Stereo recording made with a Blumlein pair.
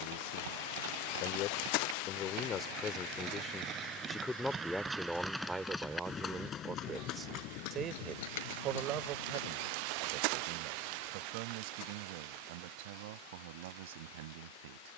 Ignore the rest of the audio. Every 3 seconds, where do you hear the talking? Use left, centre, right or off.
left, centre, right, right, right.